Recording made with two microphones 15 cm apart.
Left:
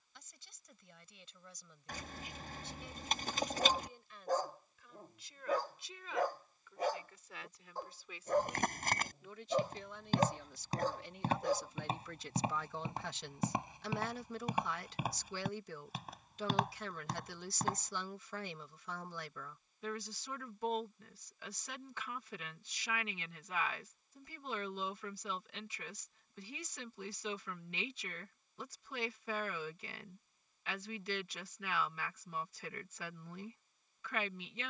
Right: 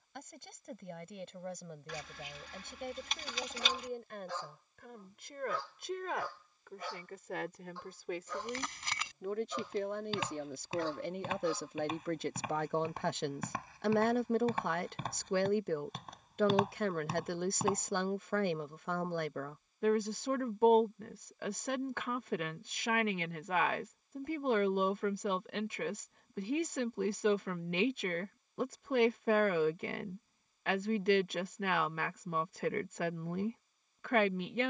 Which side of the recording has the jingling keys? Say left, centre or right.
left.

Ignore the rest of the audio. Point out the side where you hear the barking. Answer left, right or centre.
left.